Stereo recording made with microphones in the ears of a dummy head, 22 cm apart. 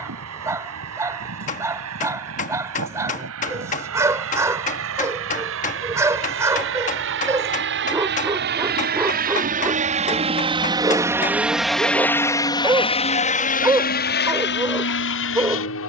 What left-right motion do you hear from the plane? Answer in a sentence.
In this clip you hear the plane travel towards the left.